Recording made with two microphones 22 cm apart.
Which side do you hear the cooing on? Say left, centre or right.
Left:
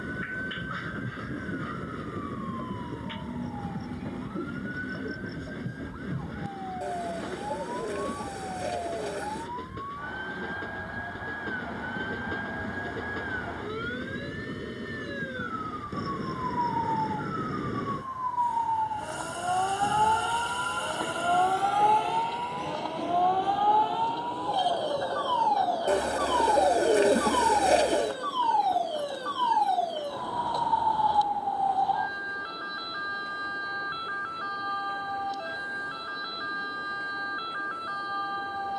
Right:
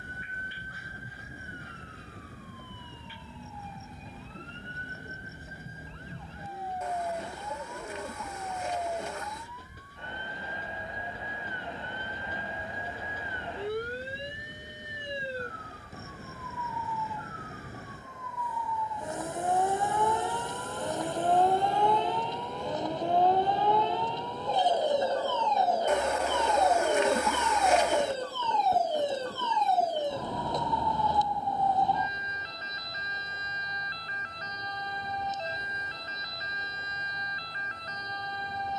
left.